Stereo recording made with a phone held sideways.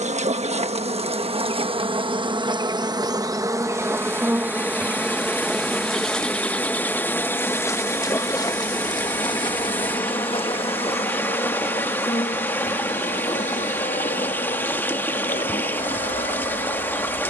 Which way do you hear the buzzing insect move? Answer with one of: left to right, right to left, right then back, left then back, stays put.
right to left.